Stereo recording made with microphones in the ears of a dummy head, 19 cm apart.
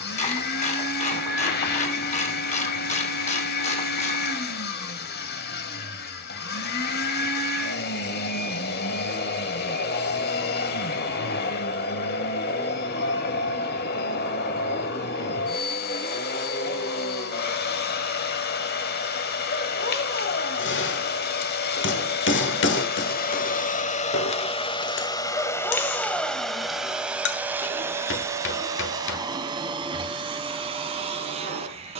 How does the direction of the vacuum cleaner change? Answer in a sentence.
In this clip you hear the vacuum cleaner move from left to right.